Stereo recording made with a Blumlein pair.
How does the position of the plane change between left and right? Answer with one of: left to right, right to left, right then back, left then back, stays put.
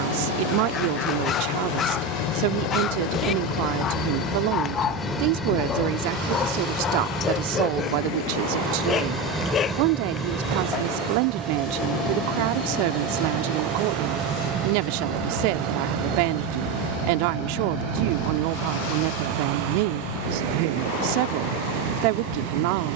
left to right.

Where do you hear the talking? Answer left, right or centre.
right.